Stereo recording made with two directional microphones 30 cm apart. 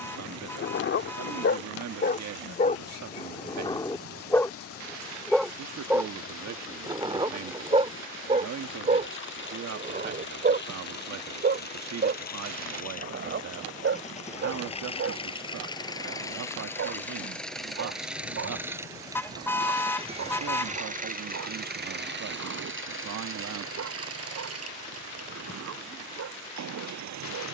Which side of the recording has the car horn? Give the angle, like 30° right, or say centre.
10° left.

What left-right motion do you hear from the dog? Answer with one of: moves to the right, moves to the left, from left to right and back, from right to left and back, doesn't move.
moves to the right.